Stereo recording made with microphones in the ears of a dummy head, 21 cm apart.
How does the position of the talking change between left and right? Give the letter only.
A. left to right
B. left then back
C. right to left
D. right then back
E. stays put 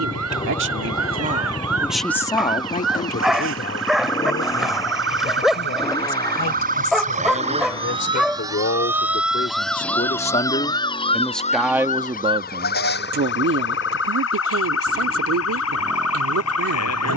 B.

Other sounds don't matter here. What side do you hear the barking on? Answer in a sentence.
In this clip you hear the barking in the centre.